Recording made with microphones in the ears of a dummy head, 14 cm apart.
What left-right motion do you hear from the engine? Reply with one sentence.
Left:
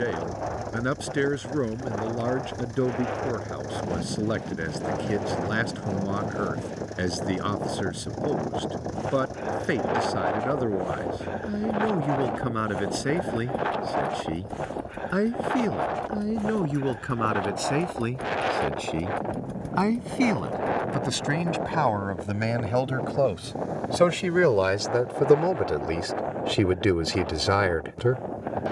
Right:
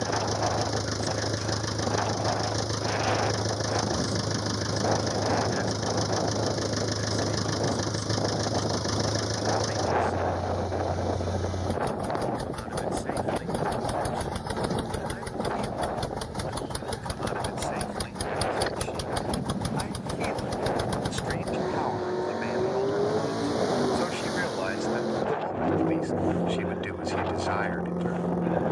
You can hear the engine stay in one place.